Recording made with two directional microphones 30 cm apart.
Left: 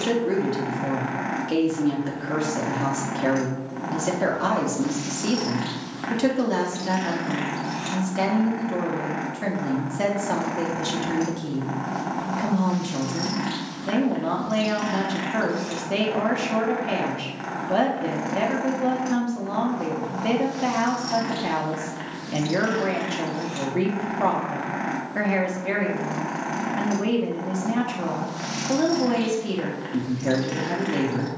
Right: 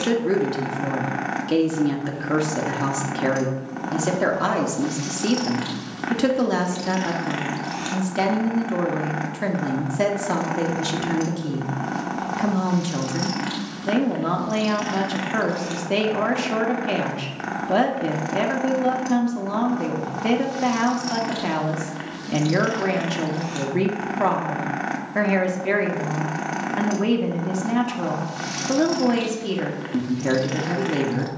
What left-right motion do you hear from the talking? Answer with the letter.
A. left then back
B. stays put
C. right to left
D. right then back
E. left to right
B.